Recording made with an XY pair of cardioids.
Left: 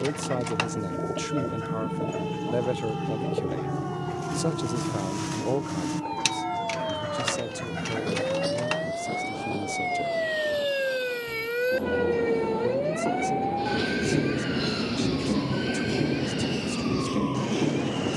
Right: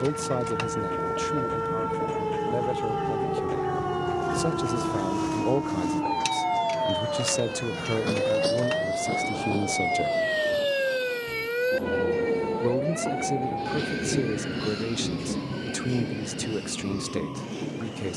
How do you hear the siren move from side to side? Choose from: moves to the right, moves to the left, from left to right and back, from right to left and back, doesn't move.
moves to the left.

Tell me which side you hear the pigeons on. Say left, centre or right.
left.